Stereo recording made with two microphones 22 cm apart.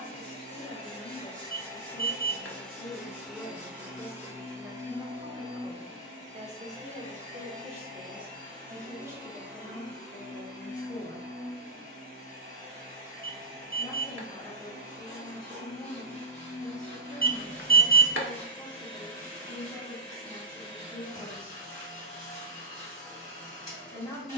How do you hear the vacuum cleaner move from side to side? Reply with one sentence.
You can hear the vacuum cleaner move to the right.